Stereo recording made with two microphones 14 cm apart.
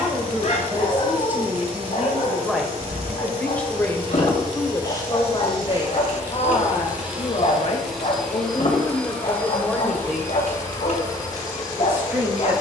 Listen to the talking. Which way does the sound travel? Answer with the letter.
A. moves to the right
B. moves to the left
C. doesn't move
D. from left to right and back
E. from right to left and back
E.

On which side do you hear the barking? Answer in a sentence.
In this clip you hear the barking on the left.